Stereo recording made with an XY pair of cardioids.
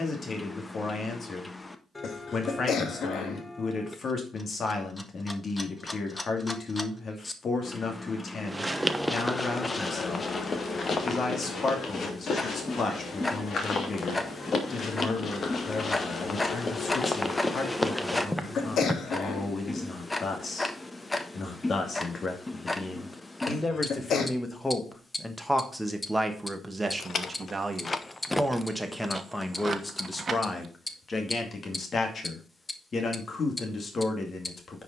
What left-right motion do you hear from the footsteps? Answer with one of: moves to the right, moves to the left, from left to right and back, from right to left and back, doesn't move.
from right to left and back.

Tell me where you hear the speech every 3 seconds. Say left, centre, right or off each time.
left, left, left, left, left, left, left, left, centre, centre, left, left.